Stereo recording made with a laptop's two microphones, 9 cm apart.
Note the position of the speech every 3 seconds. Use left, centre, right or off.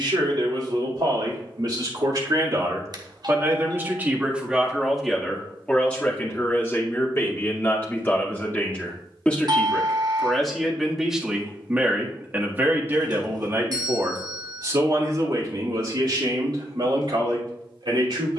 right, centre, left, centre, right, right.